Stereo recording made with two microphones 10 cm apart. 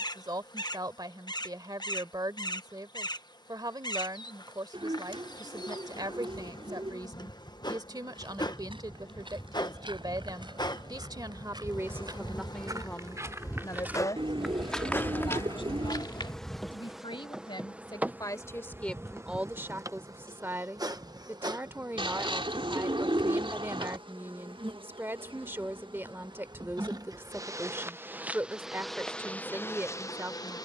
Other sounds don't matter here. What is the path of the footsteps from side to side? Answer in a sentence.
In this clip you hear the footsteps go from the right side to the left.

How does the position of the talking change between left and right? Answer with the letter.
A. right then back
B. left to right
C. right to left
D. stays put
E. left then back
E.